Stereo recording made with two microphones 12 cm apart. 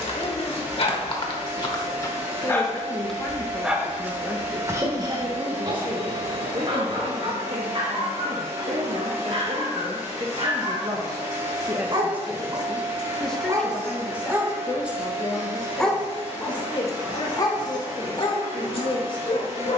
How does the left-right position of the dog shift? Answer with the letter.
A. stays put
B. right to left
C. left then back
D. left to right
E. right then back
E.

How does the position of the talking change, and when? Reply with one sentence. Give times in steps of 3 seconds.
You can hear the talking on the left from 0 s, in the centre from 3 s, on the right from 6 s, in the centre from 12 s and on the left from 15 s.